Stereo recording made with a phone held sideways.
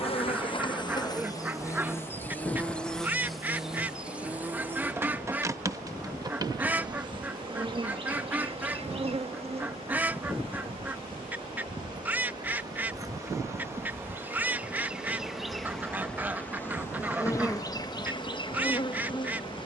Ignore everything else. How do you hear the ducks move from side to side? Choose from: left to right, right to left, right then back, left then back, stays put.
stays put.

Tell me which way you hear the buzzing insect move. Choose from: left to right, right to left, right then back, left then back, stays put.
right then back.